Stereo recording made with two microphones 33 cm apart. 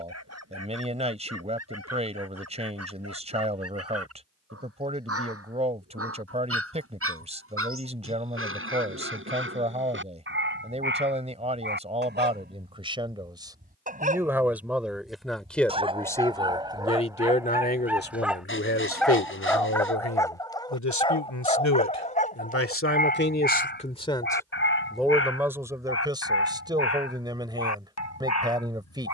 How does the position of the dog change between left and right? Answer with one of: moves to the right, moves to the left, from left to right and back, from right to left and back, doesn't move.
moves to the left.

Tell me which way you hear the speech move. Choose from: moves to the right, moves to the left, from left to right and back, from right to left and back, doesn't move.
from right to left and back.